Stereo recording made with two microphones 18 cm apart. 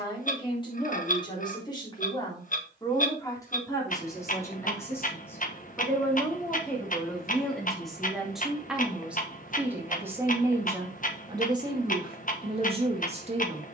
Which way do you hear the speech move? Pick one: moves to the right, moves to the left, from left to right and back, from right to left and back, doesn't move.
moves to the right.